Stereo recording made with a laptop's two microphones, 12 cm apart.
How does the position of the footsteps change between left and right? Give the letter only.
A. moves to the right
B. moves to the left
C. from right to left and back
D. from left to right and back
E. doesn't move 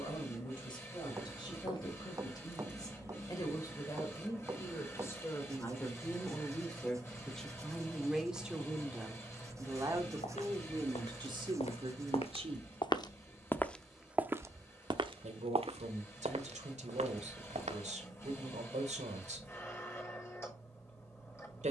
A.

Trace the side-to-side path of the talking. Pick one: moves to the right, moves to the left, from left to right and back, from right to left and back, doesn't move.
moves to the right.